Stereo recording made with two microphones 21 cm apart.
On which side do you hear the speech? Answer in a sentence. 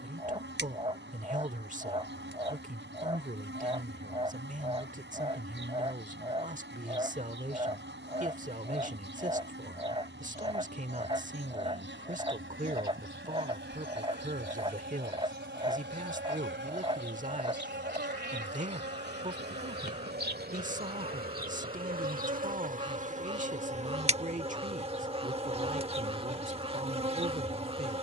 You can hear the speech on the right.